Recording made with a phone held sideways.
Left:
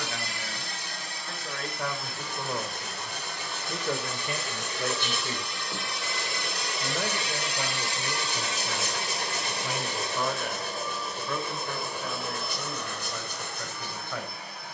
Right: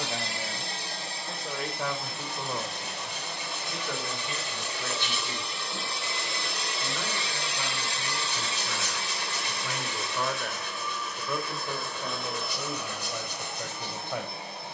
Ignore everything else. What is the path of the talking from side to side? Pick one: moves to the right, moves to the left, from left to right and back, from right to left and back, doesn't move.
from right to left and back.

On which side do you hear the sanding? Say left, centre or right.
left.